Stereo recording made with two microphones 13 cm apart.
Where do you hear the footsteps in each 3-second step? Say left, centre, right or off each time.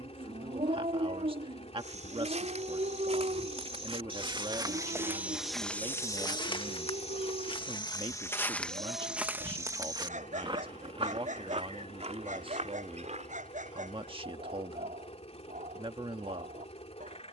right, right, left, right, right, off.